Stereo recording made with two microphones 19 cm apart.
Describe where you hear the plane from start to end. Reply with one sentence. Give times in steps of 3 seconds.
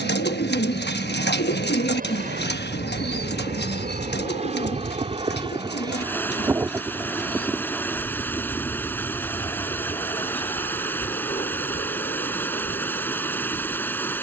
You can hear the plane on the right from 0 s, in the centre from 6 s and on the left from 9 s.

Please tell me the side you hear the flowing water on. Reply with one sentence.
You can hear the flowing water in the centre.